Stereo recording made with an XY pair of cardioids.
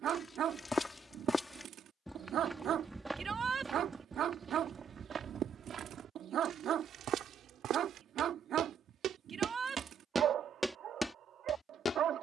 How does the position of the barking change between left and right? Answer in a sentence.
You can hear the barking stay in one place.